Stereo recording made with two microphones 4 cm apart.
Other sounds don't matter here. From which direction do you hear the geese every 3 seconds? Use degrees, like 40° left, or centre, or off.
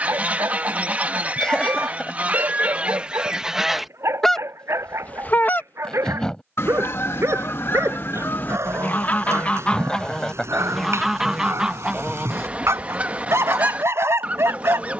30° right, 10° left, 50° left, 10° left, 30° right.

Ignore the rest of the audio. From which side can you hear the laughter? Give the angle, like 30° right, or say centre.
10° left.